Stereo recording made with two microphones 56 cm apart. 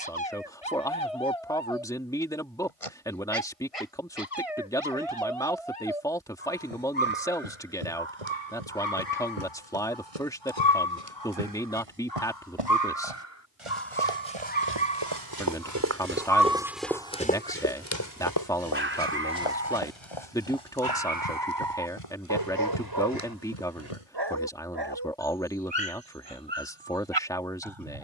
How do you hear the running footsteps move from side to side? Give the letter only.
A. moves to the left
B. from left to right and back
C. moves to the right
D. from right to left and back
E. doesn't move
A.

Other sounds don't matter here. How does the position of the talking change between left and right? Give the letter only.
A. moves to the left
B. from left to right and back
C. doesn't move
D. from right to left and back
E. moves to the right
C.